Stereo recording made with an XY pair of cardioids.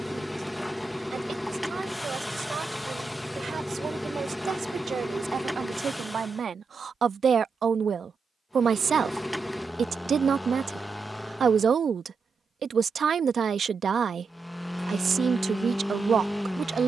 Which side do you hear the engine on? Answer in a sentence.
In this clip you hear the engine in the centre.